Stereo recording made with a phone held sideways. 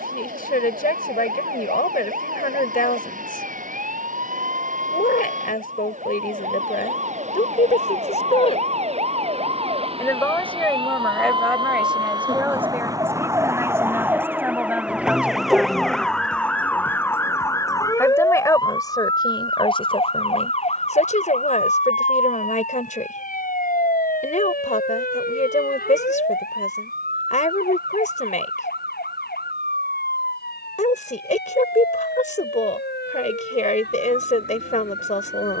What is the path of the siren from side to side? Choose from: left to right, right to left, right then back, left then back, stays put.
right to left.